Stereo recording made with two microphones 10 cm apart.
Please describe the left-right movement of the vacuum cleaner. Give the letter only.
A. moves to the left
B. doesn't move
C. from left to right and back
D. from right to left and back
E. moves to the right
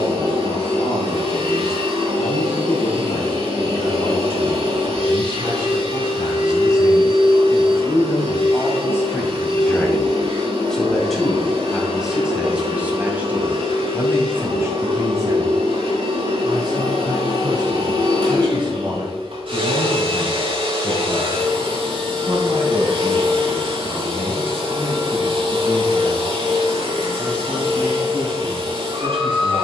B.